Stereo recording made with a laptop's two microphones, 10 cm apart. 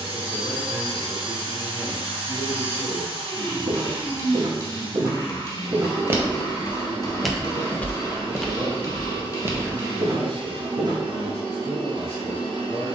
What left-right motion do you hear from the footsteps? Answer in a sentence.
In this clip you hear the footsteps go left and come back.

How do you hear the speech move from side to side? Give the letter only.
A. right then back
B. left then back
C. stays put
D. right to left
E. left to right
C.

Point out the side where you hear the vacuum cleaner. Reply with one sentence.
In this clip you hear the vacuum cleaner on the right.